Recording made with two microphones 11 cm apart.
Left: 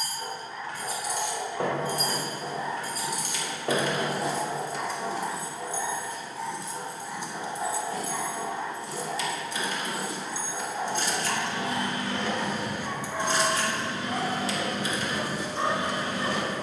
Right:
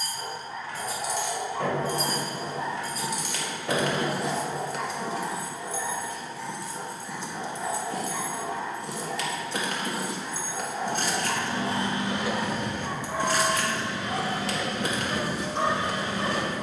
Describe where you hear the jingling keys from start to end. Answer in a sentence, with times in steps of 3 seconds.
In this clip you hear the jingling keys on the left from 0 s, in the centre from 6 s, on the right from 9 s and on the left from 12 s.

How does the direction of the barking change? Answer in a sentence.
You can hear the barking go left and come back.